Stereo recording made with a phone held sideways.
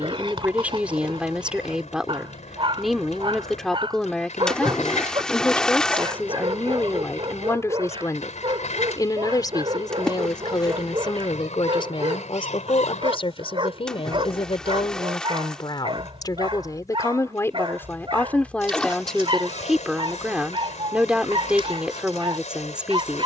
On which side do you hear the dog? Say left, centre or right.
right.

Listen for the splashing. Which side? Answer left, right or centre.
centre.